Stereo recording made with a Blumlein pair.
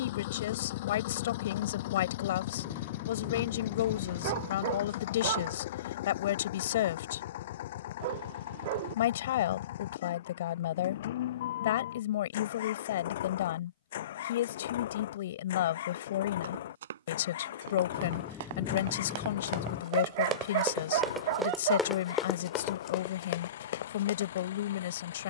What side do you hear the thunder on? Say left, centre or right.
left.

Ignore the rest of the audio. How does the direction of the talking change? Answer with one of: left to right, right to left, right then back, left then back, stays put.
stays put.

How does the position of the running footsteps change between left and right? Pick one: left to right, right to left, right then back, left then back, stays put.
right to left.